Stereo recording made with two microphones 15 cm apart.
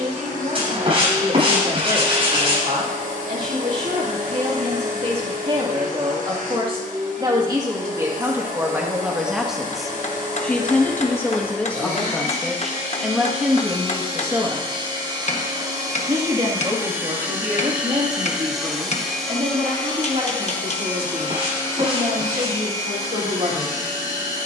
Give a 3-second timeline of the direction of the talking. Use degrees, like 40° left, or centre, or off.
60° right, 50° right, 20° right, 10° left, 10° right, 40° right, 50° right, 60° right.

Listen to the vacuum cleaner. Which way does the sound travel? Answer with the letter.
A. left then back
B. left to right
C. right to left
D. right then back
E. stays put
C.